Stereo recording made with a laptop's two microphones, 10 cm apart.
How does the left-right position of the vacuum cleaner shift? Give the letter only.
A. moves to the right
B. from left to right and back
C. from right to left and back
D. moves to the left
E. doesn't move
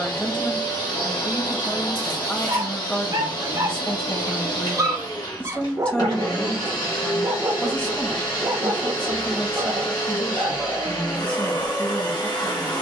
E.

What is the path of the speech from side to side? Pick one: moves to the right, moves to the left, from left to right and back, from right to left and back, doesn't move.
doesn't move.